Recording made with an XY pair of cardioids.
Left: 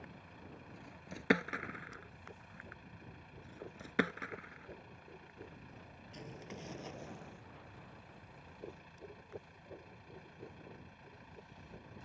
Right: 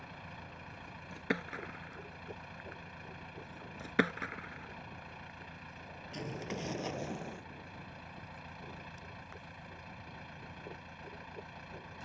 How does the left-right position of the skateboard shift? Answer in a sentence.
In this clip you hear the skateboard travel towards the right.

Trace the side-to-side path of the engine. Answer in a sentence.
In this clip you hear the engine stay in one place.